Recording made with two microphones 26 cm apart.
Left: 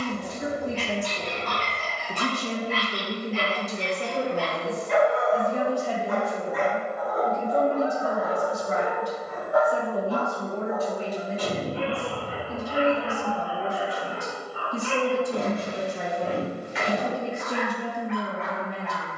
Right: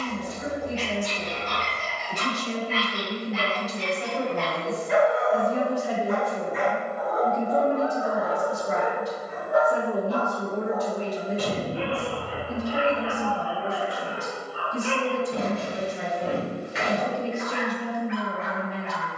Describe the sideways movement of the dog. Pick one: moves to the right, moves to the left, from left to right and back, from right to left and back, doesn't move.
moves to the right.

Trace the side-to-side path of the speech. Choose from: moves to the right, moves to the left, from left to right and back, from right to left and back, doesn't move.
from left to right and back.